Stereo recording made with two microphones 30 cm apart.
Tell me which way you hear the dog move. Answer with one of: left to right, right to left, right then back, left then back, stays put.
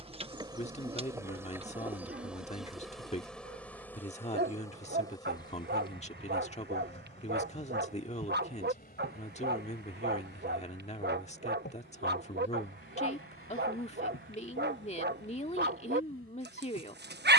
stays put.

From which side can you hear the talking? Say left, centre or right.
left.